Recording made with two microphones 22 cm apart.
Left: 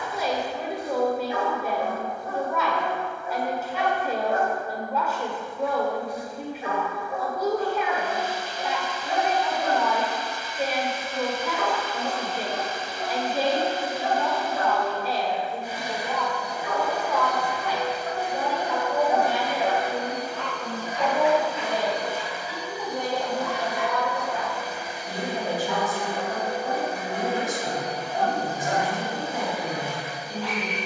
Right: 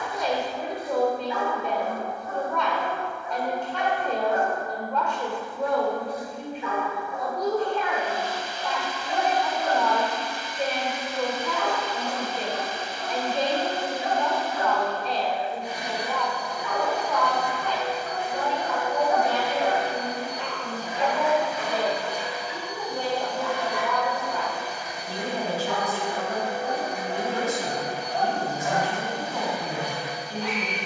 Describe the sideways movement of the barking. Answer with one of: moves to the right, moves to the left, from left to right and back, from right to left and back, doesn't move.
moves to the right.